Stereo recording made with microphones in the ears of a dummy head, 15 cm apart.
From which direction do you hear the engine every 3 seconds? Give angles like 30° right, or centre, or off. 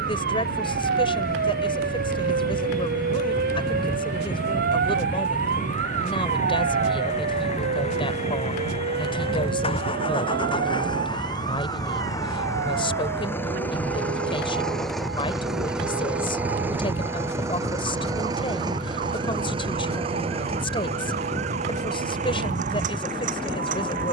60° left, 50° left, 40° left, 30° left, 10° left, 10° right, 30° right, 50° right.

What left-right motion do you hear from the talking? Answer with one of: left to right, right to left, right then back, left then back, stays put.
stays put.